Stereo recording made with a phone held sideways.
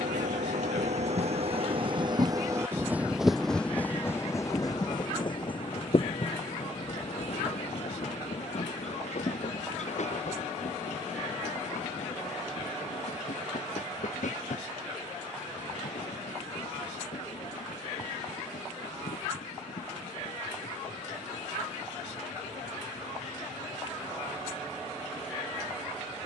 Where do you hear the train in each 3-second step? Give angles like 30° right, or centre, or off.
50° right, 20° left, 50° left, 60° left, 60° left, 70° left, 70° left, 70° left, 70° left.